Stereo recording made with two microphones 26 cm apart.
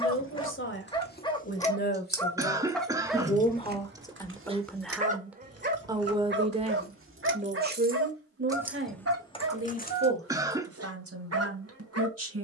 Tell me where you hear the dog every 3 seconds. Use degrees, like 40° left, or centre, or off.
10° left, 20° right, 50° right, 70° right.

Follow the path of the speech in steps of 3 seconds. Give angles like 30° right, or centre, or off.
40° left, 10° left, 30° right, 60° right.